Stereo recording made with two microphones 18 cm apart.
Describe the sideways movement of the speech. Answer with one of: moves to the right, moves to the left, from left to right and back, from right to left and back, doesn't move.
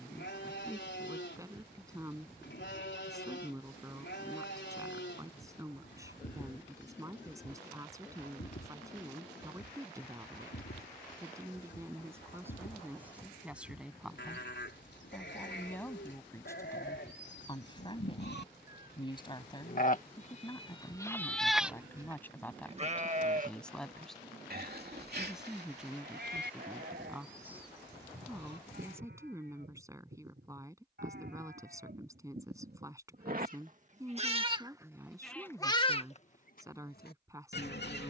from right to left and back.